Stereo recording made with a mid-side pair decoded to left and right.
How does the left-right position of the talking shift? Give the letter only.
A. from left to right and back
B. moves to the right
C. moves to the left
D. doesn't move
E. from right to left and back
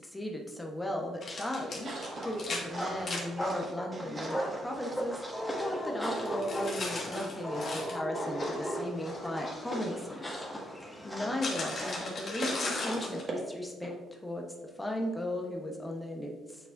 D.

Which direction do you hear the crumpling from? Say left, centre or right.
left.